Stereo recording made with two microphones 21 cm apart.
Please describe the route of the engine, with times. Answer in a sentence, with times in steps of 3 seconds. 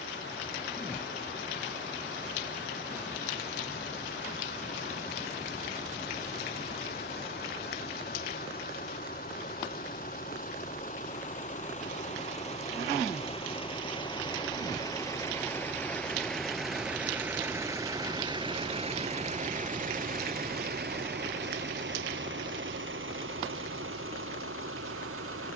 You can hear the engine on the left from 0 s, in the centre from 15 s and on the right from 18 s.